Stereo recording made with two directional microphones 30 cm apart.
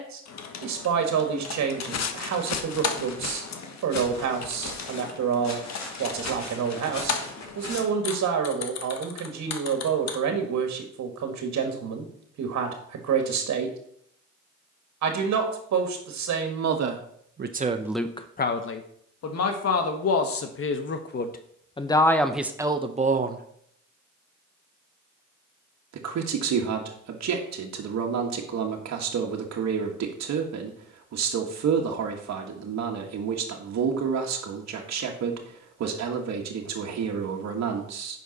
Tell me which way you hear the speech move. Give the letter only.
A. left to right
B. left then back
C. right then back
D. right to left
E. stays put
B.